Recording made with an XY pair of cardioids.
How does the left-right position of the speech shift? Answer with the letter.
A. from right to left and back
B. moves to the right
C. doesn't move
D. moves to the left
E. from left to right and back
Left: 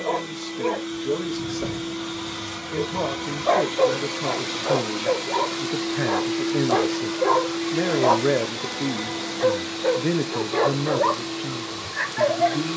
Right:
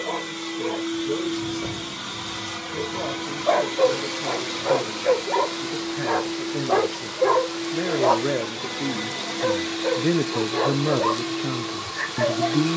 B.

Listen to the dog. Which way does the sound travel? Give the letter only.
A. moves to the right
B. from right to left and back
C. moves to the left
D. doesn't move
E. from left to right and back
E.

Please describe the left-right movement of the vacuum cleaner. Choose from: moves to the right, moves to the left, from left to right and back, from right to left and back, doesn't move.
from right to left and back.